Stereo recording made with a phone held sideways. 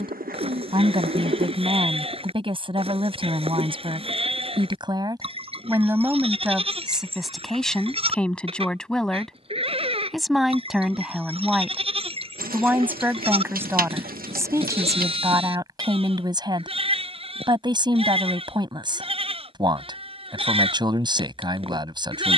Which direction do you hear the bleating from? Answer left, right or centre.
right.